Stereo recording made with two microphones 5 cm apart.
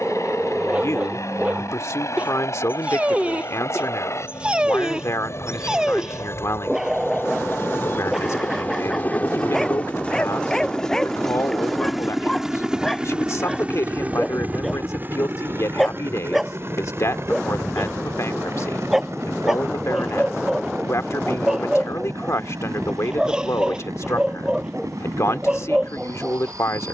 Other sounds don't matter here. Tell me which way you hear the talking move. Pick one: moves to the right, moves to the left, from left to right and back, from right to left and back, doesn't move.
doesn't move.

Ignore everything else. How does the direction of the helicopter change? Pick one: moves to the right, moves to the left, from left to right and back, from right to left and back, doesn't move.
moves to the right.